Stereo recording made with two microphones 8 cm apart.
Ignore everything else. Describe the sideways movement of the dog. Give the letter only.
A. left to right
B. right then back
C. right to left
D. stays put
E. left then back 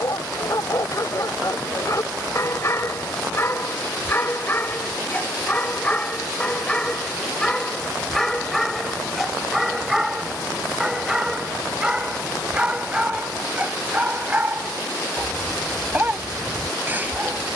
A.